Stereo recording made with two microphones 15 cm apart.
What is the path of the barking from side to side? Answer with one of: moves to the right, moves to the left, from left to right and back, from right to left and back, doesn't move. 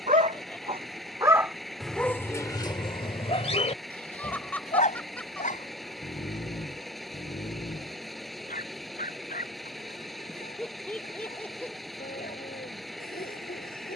moves to the left.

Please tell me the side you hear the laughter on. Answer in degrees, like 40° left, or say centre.
10° left.